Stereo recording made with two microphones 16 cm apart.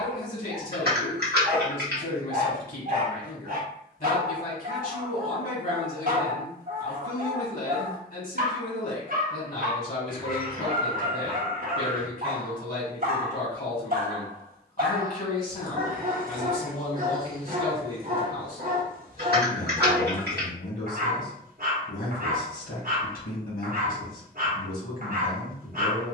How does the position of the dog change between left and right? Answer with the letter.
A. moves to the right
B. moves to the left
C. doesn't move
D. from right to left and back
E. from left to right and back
C.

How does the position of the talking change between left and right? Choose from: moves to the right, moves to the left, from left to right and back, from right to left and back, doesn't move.
doesn't move.